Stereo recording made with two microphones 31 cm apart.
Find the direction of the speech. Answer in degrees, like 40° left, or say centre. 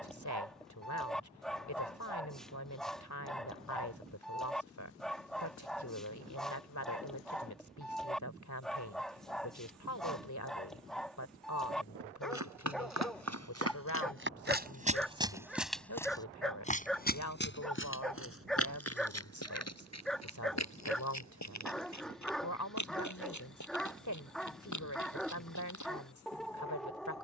60° left.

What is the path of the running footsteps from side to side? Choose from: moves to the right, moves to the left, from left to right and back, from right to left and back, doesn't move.
moves to the left.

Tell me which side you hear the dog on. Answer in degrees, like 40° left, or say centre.
centre.